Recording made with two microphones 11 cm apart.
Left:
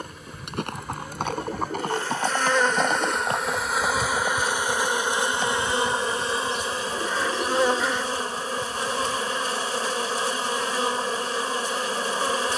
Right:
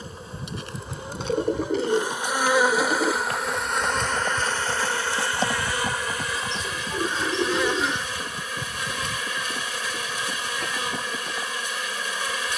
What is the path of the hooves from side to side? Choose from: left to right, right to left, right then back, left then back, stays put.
left to right.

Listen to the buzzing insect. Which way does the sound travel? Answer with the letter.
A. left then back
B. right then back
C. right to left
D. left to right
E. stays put
C.